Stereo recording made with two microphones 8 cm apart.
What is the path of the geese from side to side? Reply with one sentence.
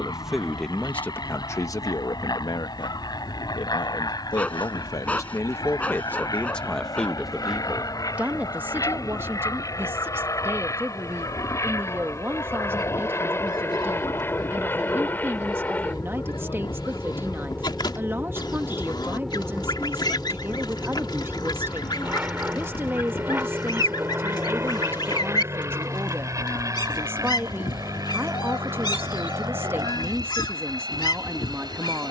In this clip you hear the geese stay in one place.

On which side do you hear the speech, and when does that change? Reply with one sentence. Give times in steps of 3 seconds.
You can hear the speech on the left from 0 s, in the centre from 6 s and on the right from 9 s.